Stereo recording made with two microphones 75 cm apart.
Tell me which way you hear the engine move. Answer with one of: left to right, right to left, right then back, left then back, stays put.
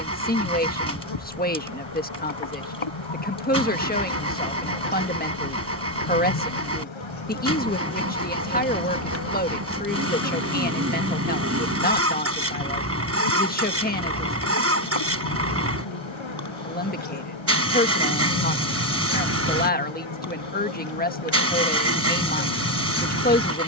stays put.